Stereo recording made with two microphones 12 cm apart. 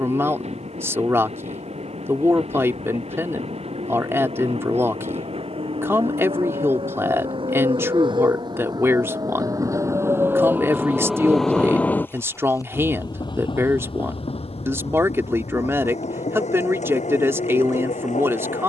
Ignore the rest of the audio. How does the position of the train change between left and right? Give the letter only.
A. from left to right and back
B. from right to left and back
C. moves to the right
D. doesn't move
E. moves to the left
E.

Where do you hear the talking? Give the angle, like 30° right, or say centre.
20° right.